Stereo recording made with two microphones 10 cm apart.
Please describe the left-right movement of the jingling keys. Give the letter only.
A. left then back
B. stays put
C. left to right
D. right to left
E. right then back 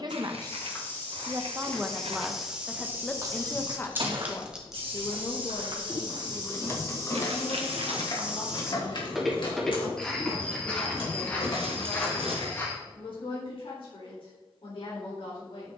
D.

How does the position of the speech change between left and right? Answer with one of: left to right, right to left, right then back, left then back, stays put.
right to left.